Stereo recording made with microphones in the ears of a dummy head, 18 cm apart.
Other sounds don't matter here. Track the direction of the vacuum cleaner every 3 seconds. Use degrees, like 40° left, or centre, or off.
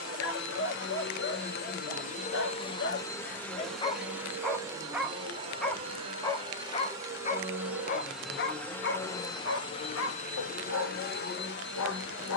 50° left, 10° right, 10° right, 40° left.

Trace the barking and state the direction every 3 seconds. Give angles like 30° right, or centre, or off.
70° left, 20° left, 40° left, 70° left.